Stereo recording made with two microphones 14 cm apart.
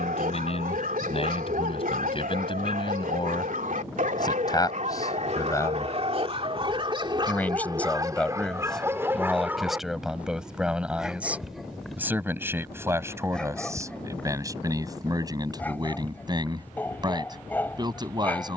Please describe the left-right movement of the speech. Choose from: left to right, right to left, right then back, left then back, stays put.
left to right.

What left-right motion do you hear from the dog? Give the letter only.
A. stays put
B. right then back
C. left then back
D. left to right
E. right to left
E.